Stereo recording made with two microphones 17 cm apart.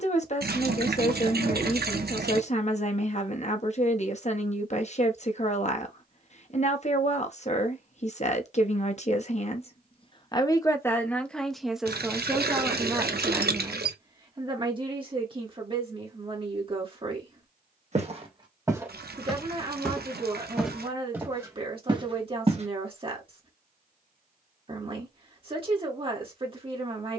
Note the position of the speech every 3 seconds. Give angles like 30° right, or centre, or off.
50° left, 50° left, 50° left, 20° left, 20° right, 30° right, 30° right, 30° right, 30° right.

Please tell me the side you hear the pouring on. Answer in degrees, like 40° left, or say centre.
80° right.